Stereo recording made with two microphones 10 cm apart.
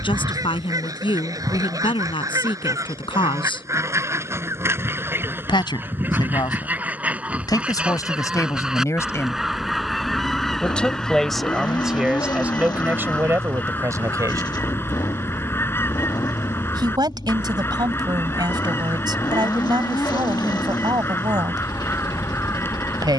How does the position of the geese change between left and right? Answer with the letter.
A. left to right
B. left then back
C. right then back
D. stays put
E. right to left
E.